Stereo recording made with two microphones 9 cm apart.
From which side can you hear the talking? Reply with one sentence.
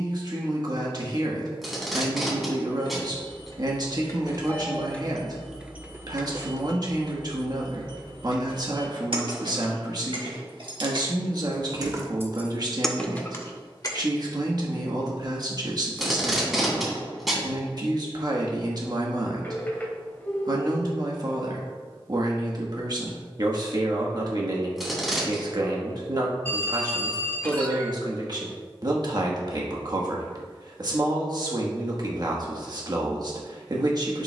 You can hear the talking on the right.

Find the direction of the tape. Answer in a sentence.
You can hear the tape in the centre.